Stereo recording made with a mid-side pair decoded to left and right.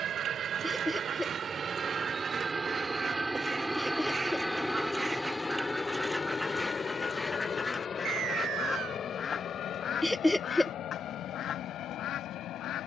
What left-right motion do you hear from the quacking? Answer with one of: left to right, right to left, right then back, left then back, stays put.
right to left.